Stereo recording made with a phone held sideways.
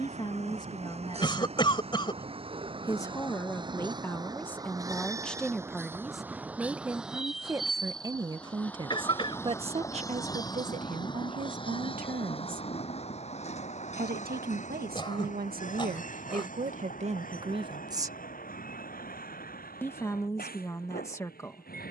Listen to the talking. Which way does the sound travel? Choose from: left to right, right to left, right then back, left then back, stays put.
right then back.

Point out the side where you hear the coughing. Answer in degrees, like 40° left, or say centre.
30° left.